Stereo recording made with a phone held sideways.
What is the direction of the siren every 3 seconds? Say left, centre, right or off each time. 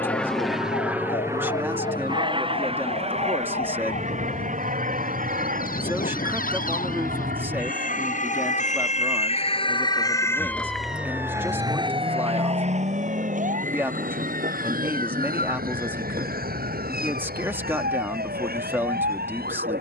left, left, left, centre, right, right, right.